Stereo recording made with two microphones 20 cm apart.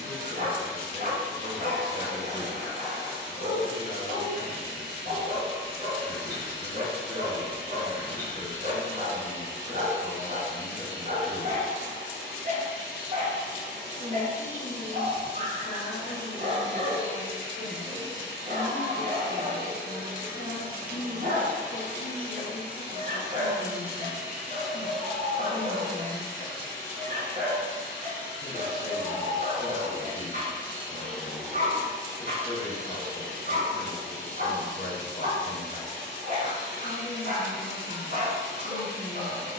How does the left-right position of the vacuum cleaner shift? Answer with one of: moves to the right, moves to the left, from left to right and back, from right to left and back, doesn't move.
from right to left and back.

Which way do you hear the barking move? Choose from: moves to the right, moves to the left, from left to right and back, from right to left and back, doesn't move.
doesn't move.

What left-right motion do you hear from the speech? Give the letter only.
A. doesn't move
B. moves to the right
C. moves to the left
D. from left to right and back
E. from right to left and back
A.